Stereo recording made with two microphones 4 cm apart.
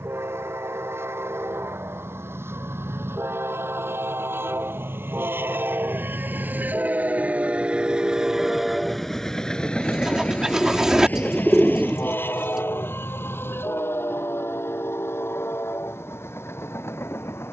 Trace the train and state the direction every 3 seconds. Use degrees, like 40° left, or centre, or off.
80° right, 60° right, 30° right, 30° left, 60° left, 70° left.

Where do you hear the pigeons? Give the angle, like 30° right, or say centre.
10° right.